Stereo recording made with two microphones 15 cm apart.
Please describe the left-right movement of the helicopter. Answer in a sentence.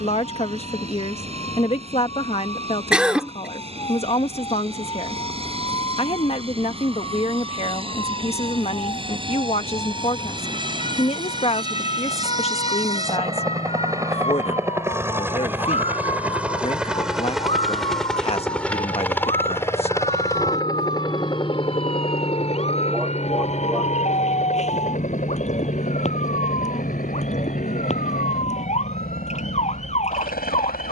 In this clip you hear the helicopter go from the right side to the left.